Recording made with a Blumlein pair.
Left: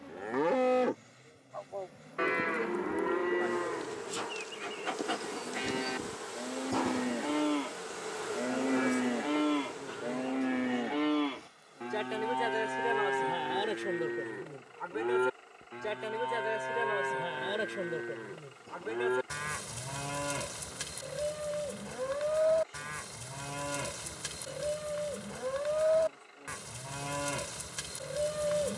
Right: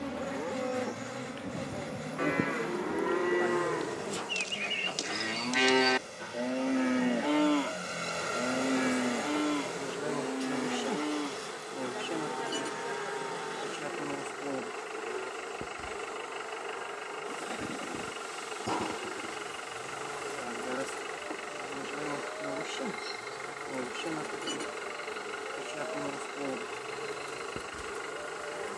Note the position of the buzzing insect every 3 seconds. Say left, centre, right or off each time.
right, centre, left, right, right, right, right, right, right, right.